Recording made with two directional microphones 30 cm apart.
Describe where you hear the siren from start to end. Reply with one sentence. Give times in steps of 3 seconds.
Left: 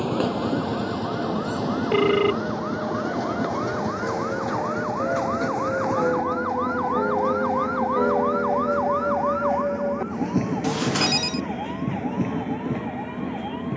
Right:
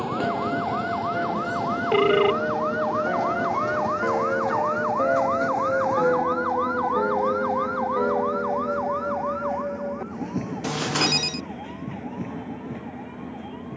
In this clip you hear the siren on the right from 0 s, in the centre from 6 s and on the left from 9 s.